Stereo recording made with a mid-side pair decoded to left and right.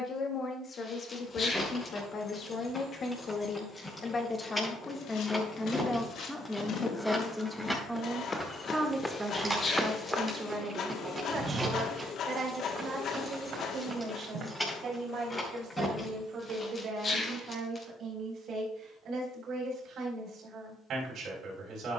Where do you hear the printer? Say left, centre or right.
left.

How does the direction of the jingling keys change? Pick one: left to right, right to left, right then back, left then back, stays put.
right then back.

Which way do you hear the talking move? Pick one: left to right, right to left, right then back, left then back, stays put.
left to right.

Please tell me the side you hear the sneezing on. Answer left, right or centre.
left.